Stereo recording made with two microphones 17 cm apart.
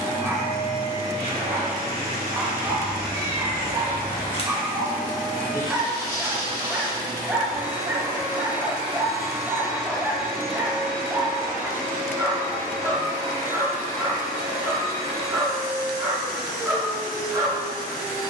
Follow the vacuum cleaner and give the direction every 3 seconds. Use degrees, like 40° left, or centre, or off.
70° right, 50° right, 20° right, centre, 20° left, 20° left.